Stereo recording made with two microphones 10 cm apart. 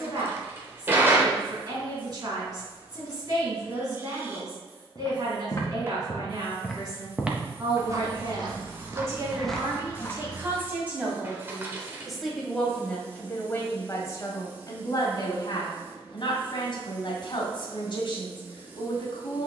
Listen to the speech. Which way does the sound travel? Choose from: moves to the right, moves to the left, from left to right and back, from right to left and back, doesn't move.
moves to the left.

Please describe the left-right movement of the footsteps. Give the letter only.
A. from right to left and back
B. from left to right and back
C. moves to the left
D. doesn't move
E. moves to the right
B.